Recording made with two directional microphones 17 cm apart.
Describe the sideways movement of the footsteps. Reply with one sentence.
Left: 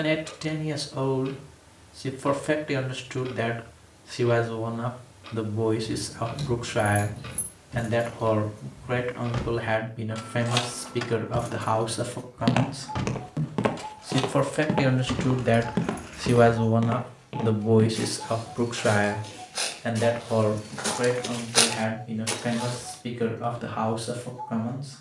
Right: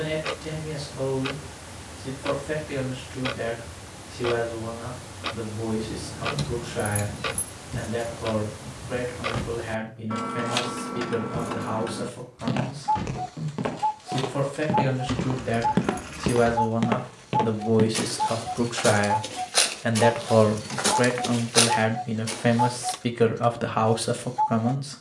You can hear the footsteps go right and come back.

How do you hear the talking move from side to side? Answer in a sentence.
In this clip you hear the talking go from the left side to the right.